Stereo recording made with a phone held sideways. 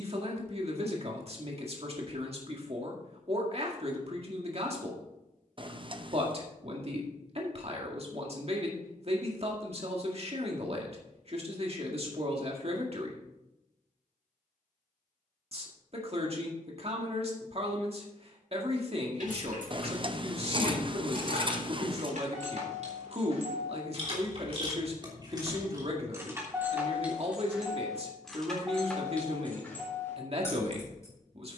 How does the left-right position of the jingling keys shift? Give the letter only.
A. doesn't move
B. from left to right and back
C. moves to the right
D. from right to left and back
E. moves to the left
E.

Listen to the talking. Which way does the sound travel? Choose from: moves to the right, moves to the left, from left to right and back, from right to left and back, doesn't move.
doesn't move.